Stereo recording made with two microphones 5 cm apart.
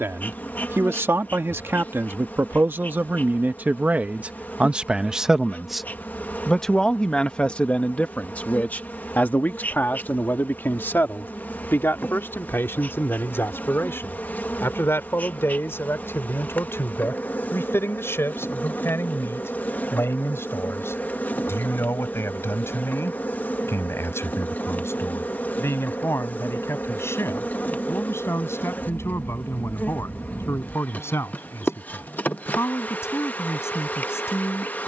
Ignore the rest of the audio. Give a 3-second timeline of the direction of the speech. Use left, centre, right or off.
right, right, left, left, left, left, left, left, left, left, left, left.